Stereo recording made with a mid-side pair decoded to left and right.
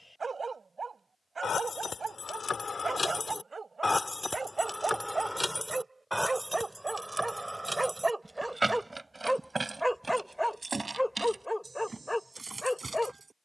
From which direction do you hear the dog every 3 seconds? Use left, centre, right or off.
right, right, right, centre, centre.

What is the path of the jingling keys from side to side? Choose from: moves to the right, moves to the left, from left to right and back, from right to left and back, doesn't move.
moves to the right.